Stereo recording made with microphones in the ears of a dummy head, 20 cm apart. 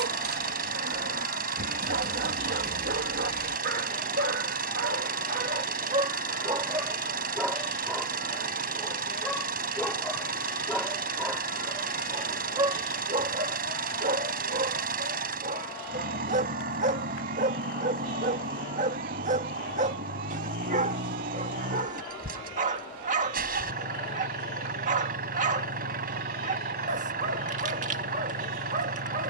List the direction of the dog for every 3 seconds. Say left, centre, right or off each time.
right, right, centre, centre, right, right, right, right, right, right.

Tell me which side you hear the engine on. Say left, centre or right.
right.